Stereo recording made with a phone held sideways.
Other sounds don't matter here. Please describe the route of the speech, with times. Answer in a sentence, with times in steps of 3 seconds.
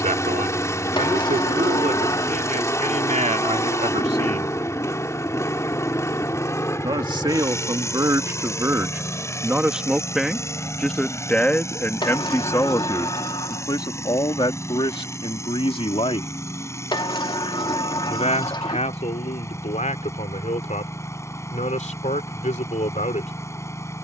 In this clip you hear the speech on the right from 0 s, in the centre from 9 s and on the left from 12 s.